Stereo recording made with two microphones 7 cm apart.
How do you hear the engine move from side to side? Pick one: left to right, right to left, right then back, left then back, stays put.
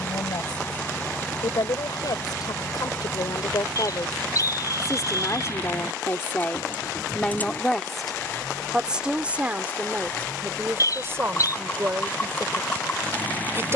stays put.